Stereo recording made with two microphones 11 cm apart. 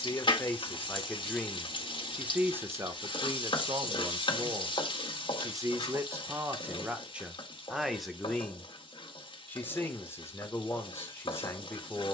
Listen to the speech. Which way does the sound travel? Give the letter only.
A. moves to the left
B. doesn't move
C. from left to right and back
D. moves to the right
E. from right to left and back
C.